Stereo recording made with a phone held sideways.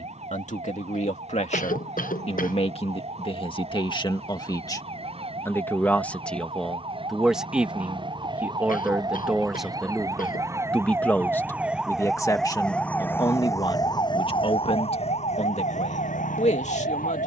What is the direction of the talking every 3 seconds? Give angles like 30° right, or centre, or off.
50° left, 30° left, centre, centre, 30° left, 50° left.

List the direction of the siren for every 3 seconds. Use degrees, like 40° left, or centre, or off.
50° right, 50° right, 40° right, 20° right, 20° left, 60° left.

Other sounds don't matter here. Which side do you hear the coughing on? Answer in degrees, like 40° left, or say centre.
80° left.